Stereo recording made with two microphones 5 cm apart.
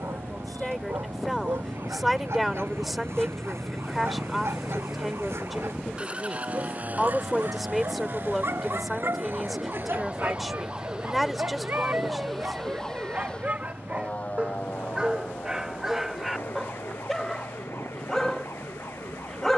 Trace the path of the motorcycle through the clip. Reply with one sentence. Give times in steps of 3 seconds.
In this clip you hear the motorcycle on the left from 0 s, in the centre from 3 s and on the right from 6 s.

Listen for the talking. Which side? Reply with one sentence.
You can hear the talking in the centre.